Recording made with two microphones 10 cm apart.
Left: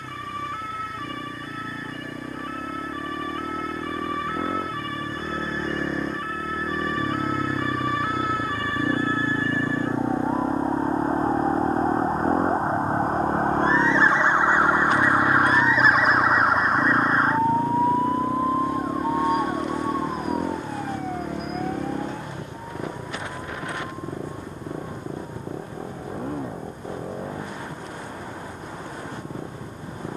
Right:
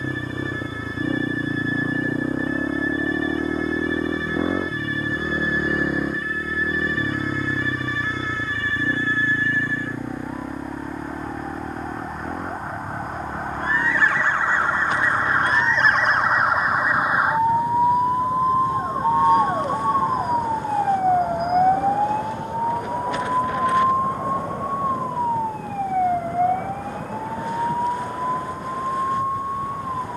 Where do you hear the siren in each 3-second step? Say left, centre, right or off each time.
left, left, left, left, left, centre, right, right, right, right.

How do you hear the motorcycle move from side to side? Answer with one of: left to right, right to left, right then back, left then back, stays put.
right to left.